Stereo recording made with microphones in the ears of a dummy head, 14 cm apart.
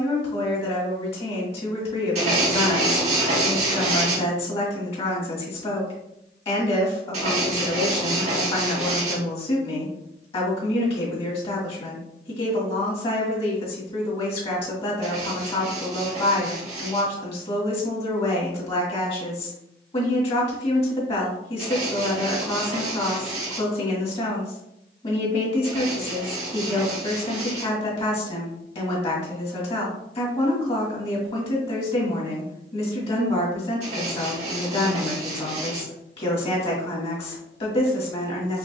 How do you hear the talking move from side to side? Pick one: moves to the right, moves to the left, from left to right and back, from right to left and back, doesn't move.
doesn't move.